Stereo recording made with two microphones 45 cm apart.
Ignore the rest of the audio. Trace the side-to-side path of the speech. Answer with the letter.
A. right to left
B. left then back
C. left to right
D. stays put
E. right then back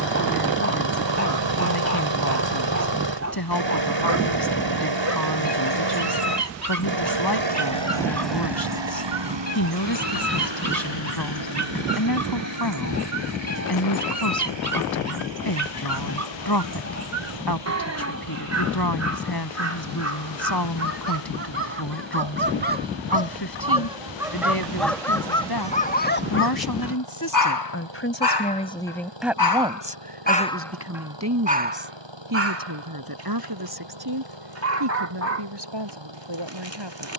C.